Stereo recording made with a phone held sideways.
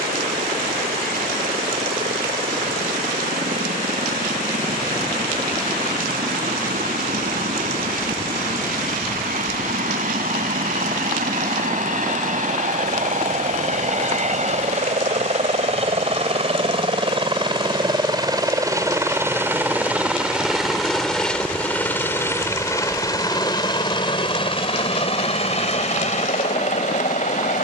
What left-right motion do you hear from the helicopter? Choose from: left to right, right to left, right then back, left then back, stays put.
right to left.